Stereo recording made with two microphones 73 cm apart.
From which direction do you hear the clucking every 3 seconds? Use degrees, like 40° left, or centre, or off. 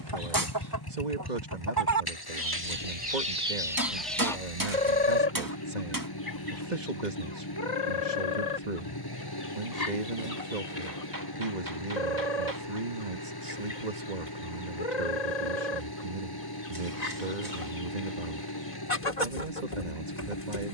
30° right, centre, 40° left, 60° left, 60° left, 60° left, 60° left.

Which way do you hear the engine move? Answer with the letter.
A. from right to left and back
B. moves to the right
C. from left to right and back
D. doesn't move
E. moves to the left
D.